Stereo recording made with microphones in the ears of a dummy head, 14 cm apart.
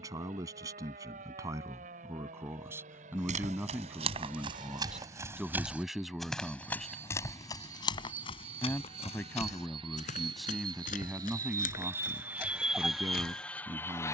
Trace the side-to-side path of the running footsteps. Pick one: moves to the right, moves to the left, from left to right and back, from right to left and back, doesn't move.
moves to the left.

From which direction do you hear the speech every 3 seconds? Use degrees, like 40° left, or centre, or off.
20° right, 10° right, centre, centre, 20° right.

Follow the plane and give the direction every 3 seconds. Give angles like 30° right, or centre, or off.
60° right, 50° right, 50° right, 30° right, centre.